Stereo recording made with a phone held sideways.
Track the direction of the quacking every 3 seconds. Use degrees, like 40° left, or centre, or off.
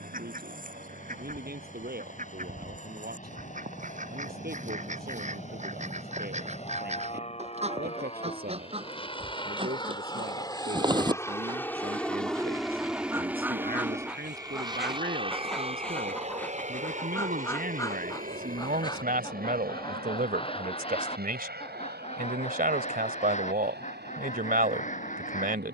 60° right, 50° right, 40° right, 30° right, 10° right, 10° left, 30° left, 40° left, 50° left.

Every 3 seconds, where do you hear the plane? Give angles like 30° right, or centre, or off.
60° left, 60° left, 50° left, 20° left, 10° right, 40° right, 60° right, 70° right, 80° right.